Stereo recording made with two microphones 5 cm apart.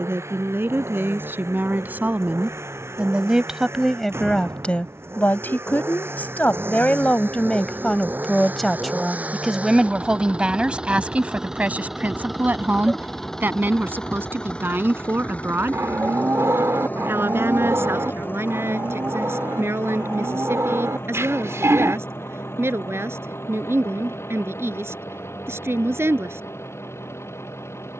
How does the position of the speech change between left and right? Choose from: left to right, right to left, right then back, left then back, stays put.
left then back.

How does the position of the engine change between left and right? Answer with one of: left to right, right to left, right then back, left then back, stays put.
right to left.